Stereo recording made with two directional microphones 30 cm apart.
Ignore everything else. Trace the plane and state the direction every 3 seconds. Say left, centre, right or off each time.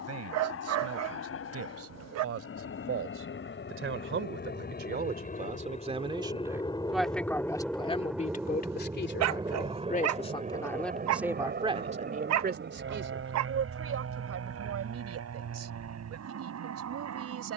left, left, centre, right, right, right.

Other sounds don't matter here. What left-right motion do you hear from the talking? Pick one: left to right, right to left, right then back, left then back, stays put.
left then back.